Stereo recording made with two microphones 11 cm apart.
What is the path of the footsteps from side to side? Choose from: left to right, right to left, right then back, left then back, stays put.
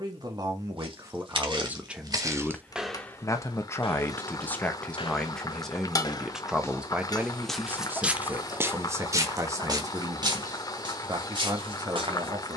left then back.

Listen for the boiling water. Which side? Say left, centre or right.
left.